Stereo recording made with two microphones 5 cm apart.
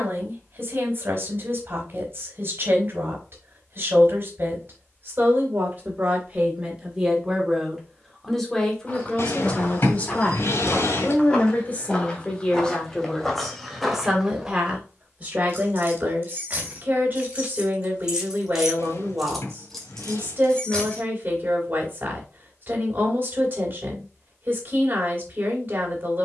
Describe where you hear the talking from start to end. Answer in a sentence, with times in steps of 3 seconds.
In this clip you hear the talking on the right from 0 s, in the centre from 6 s, on the left from 9 s, in the centre from 12 s and on the right from 15 s.